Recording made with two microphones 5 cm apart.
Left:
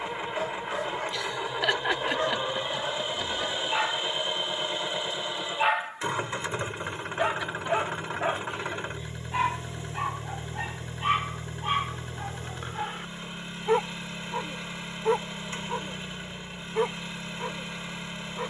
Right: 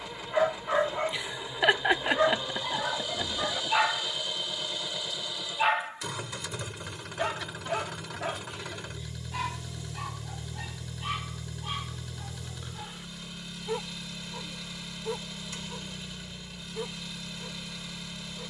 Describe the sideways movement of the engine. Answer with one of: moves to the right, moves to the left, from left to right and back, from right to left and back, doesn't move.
doesn't move.